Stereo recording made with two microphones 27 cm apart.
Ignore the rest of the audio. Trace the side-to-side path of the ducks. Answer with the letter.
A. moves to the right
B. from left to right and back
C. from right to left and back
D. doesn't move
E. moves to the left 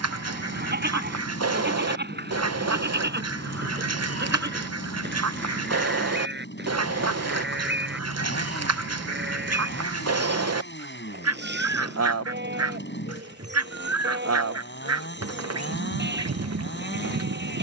D.